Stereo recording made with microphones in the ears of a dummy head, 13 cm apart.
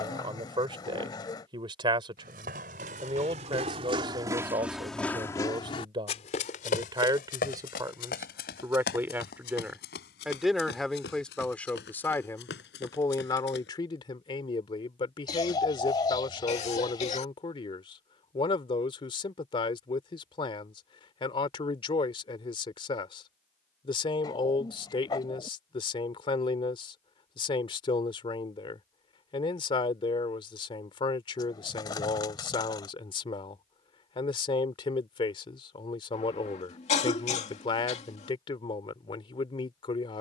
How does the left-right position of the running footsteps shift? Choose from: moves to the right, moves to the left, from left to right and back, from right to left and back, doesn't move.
moves to the left.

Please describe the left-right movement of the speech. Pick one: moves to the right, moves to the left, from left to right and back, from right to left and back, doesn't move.
moves to the left.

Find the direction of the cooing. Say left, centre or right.
left.